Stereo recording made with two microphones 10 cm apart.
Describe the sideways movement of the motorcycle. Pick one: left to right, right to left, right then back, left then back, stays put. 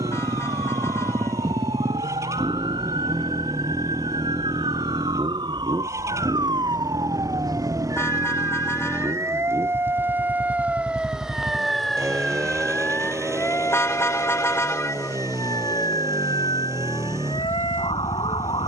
stays put.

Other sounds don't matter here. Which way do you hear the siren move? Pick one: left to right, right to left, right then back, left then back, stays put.
right to left.